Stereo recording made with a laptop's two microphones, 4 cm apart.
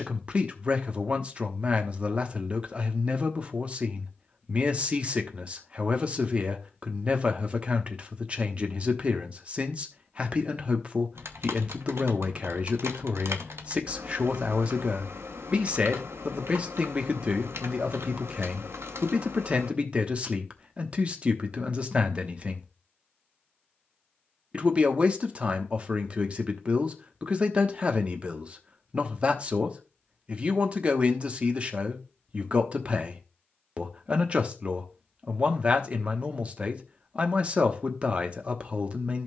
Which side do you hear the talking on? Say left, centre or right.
right.